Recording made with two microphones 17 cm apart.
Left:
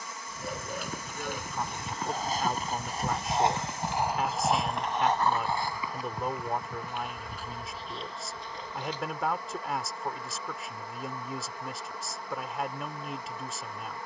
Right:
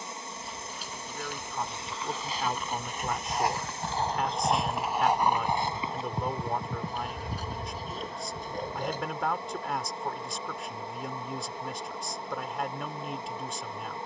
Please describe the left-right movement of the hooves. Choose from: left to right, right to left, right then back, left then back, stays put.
left to right.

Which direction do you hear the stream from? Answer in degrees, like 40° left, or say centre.
30° right.